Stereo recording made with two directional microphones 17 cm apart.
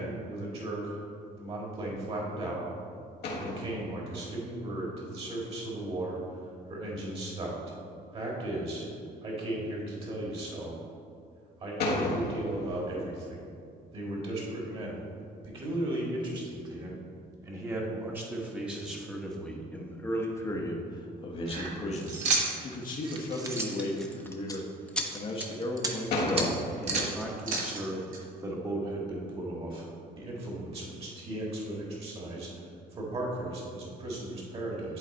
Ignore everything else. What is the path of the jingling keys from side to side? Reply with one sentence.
In this clip you hear the jingling keys move from right to left and back again.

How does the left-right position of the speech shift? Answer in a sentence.
You can hear the speech move from right to left and back again.